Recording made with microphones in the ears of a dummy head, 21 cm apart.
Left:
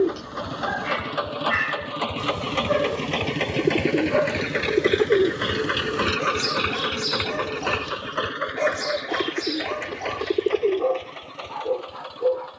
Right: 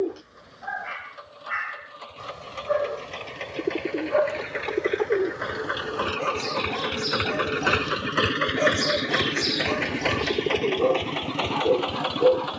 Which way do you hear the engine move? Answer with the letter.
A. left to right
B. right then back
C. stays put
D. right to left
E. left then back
A.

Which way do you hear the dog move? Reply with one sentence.
You can hear the dog travel towards the right.